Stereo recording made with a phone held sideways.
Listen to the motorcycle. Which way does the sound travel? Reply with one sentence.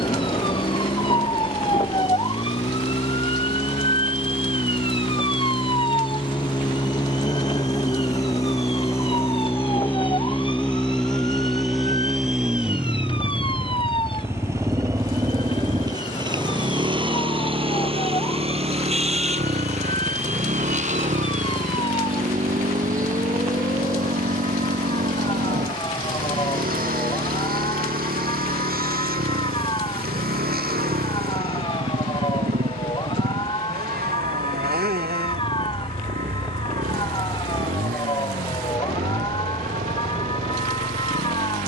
You can hear the motorcycle move from left to right.